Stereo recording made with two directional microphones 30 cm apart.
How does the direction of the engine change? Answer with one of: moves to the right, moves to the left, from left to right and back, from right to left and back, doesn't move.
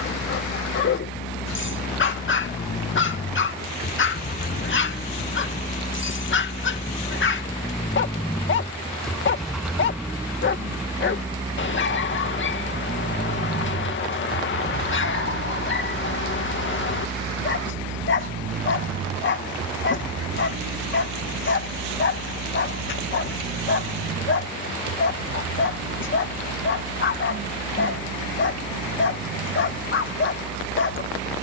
moves to the right.